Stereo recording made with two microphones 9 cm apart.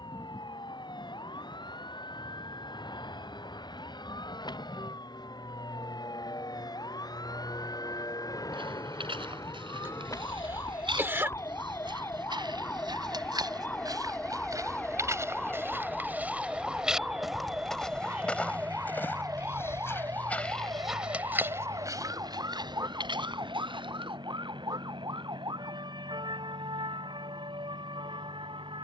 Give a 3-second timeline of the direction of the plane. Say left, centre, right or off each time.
left, left, left, left, centre, right, right, right, right, right.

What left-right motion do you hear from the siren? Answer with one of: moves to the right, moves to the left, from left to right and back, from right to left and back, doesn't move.
moves to the right.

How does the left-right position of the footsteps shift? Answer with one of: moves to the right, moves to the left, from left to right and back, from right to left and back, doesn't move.
from right to left and back.